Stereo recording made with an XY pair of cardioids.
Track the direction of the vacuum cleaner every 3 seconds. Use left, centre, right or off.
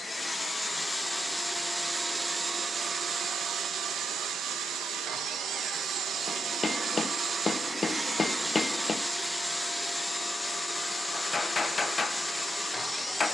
centre, right, right, centre, centre.